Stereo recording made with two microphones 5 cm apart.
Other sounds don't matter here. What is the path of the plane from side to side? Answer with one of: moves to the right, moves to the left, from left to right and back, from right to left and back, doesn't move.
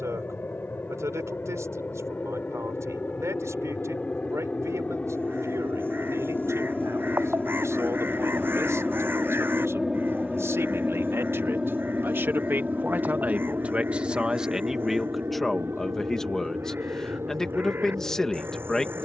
moves to the right.